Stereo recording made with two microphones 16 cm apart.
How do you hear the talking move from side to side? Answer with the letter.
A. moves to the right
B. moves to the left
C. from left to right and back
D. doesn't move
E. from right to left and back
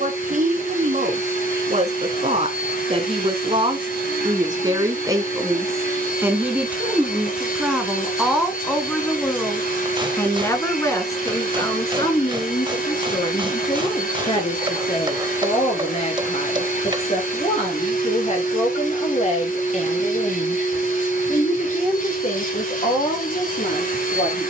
B.